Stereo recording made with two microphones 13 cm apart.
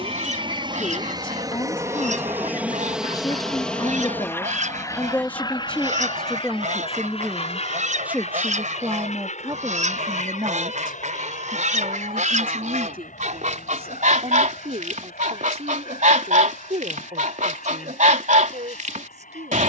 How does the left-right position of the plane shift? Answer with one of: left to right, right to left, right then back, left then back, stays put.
right to left.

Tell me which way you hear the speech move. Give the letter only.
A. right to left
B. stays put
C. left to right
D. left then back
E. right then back
C.